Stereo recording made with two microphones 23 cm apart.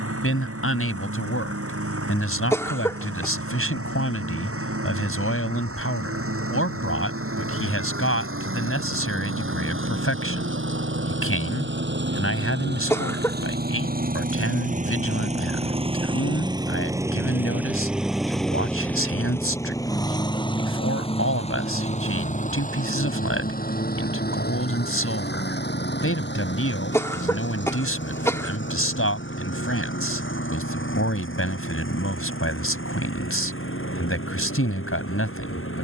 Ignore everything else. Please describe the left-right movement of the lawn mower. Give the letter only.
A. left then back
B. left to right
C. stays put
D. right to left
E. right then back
D.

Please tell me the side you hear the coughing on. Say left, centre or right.
centre.